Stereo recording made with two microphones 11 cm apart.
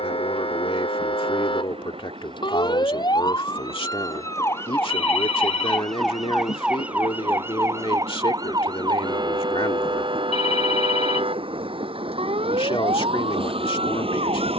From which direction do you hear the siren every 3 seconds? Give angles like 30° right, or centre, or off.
50° left, 20° left, 20° right, 50° right, 60° right.